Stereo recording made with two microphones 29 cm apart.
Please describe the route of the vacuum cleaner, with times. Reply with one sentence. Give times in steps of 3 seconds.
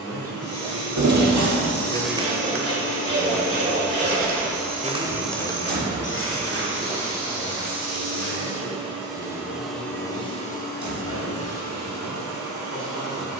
You can hear the vacuum cleaner on the left from 0 s, in the centre from 3 s, on the right from 6 s and on the left from 9 s.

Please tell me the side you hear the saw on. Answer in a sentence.
You can hear the saw on the right.